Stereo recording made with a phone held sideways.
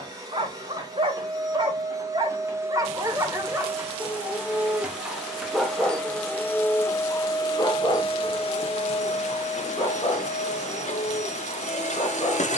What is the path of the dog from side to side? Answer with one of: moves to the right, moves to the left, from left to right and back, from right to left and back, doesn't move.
moves to the left.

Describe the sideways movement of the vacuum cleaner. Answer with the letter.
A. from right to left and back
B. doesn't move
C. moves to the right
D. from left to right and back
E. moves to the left
E.